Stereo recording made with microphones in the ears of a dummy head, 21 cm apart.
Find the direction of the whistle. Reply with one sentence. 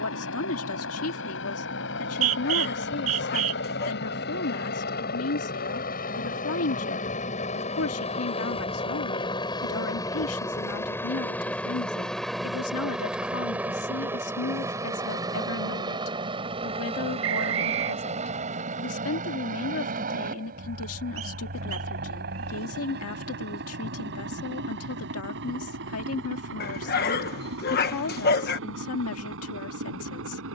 You can hear the whistle on the right.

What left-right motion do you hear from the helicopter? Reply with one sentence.
You can hear the helicopter move from left to right.